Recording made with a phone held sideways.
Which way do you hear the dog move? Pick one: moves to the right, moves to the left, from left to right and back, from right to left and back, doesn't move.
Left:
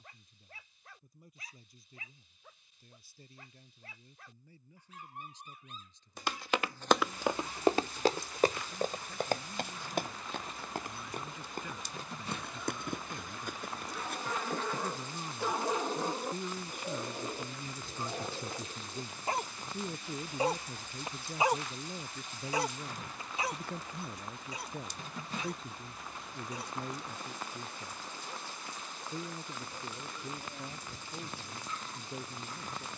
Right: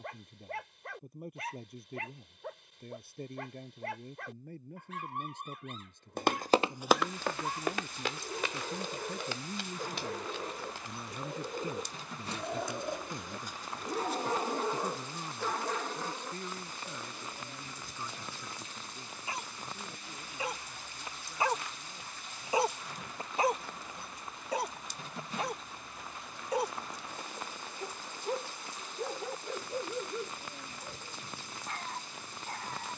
from right to left and back.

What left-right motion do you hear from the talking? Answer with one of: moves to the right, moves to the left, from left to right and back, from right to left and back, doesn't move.
moves to the left.